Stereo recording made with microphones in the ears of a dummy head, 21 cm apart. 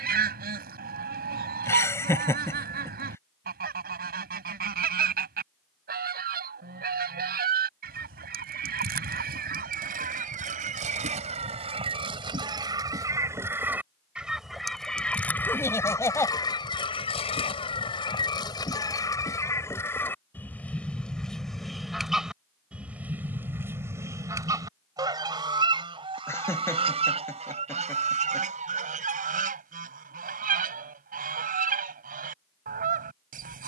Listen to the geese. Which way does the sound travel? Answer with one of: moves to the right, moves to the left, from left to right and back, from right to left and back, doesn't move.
from right to left and back.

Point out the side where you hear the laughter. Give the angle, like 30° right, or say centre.
10° left.